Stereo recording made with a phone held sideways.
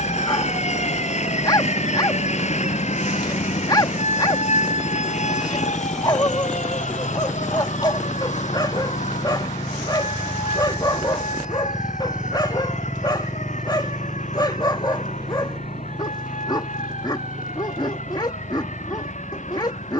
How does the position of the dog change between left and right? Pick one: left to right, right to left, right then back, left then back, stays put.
stays put.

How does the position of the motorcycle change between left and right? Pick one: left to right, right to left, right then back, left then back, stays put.
left to right.